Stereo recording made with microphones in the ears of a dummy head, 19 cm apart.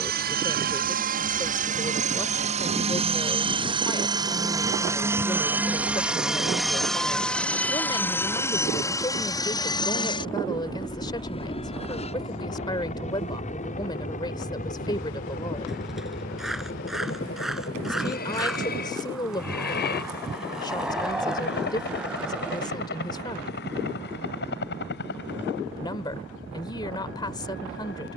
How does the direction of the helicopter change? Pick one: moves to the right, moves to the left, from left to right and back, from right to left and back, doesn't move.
moves to the left.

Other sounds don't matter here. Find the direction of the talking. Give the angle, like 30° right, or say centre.
20° left.